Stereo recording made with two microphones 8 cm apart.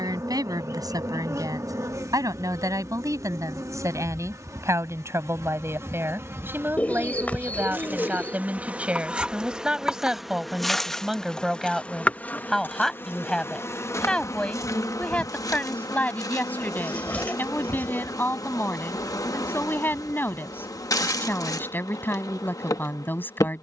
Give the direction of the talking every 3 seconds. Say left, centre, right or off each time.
right, right, right, centre, centre, left, left, left.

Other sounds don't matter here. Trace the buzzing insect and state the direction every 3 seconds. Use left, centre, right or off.
right, right, right, centre, left, left, left, left.